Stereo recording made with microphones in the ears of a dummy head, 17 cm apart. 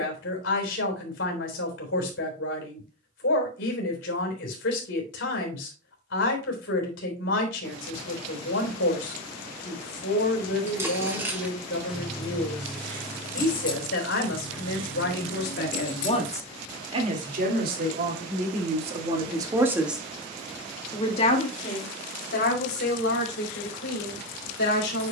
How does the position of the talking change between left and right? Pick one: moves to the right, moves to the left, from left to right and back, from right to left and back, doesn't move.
from left to right and back.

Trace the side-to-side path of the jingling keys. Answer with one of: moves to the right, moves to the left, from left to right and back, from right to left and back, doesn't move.
moves to the left.